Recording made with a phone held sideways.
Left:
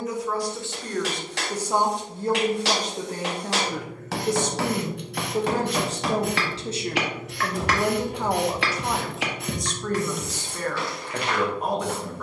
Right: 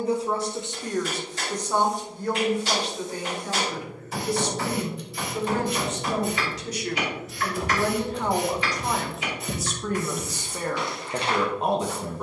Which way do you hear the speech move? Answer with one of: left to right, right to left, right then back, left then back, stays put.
left then back.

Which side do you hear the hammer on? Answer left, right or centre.
left.